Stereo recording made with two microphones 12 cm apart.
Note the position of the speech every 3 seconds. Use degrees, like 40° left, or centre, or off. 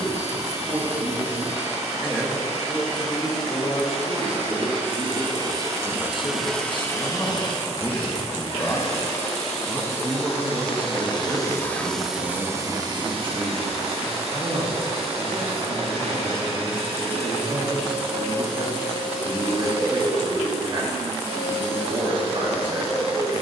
30° right, 50° left, 30° left, 20° right, 40° right, 40° right, 40° right, 40° right.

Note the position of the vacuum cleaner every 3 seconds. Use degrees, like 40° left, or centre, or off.
60° right, 50° right, 30° left, 50° left, 40° right, 60° right, 60° right, 60° right.